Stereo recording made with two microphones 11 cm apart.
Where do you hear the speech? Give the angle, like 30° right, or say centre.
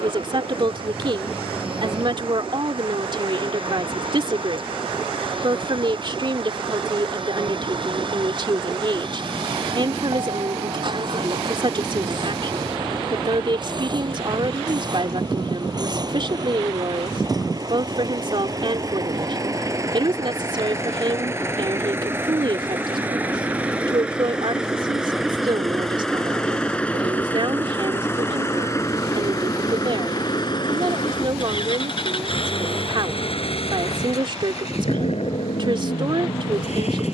50° right.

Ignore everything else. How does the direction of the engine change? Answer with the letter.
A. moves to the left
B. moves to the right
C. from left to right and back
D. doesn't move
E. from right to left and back
A.